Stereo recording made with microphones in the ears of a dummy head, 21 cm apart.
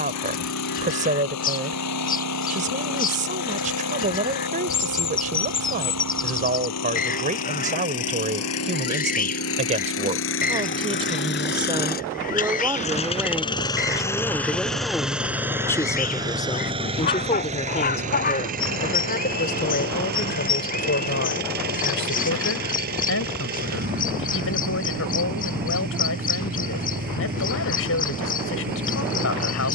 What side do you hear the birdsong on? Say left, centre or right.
left.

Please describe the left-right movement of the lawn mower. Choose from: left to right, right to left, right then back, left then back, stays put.
left to right.